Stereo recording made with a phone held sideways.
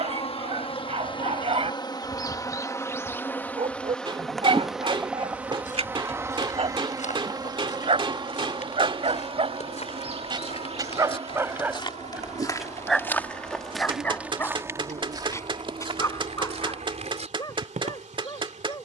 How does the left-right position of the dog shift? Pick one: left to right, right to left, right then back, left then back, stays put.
right to left.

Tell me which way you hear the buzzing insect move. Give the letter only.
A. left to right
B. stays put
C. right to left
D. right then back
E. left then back
A.